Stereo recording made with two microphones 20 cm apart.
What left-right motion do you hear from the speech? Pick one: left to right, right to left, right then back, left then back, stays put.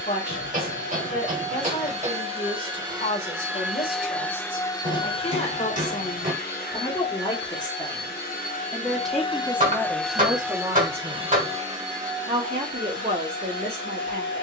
left to right.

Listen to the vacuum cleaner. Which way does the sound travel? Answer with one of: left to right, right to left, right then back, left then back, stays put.
left then back.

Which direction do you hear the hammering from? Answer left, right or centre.
right.